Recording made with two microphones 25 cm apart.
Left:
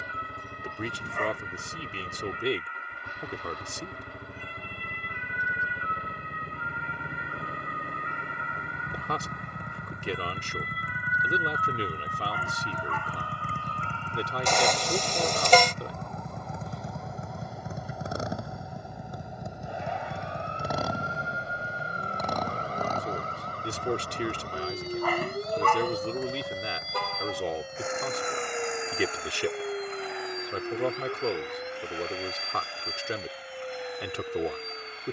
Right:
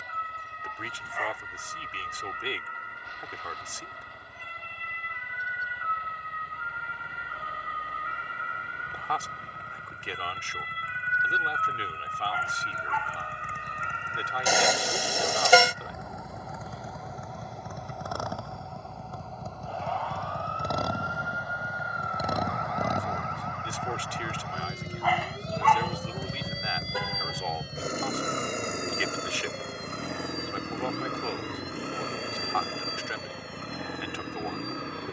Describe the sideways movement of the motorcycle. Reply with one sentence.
You can hear the motorcycle go from the left side to the right.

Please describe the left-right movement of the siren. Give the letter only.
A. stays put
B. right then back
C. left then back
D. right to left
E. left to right
D.